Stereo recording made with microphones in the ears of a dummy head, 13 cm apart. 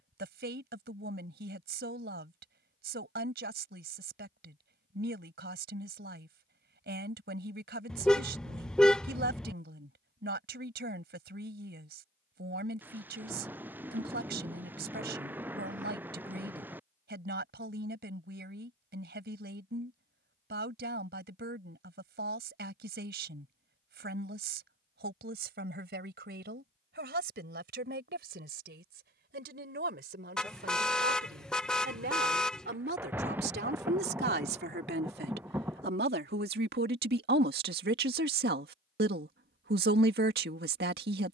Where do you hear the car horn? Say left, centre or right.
centre.